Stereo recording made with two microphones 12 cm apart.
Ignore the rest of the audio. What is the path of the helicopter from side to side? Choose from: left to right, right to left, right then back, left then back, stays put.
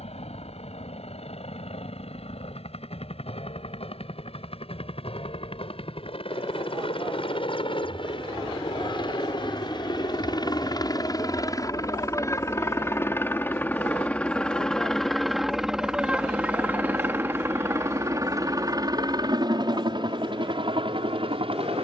left to right.